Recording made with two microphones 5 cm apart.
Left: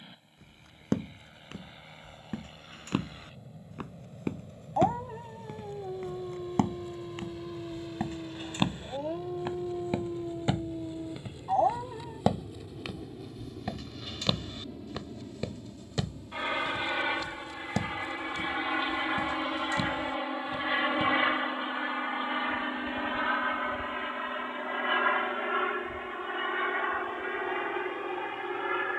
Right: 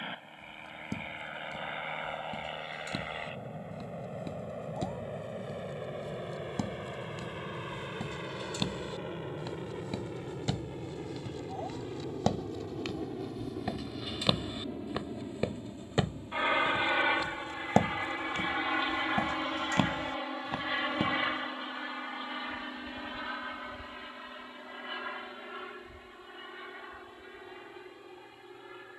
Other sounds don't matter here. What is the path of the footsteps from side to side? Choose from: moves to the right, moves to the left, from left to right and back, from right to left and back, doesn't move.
moves to the right.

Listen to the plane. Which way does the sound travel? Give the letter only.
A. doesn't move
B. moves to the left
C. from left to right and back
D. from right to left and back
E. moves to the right
B.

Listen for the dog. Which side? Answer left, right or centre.
left.